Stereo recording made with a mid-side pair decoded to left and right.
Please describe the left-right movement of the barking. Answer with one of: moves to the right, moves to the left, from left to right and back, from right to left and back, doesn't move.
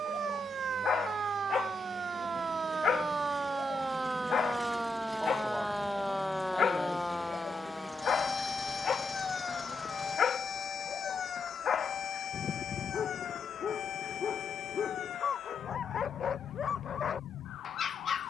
doesn't move.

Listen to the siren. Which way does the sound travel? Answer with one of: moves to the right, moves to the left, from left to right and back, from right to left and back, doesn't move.
moves to the left.